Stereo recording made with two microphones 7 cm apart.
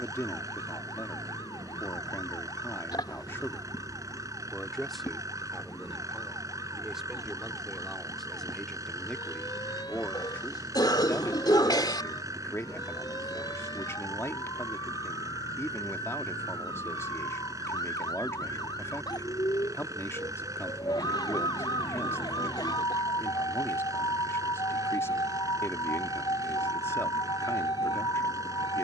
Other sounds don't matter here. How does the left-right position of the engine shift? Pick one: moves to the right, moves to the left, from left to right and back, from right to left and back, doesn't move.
doesn't move.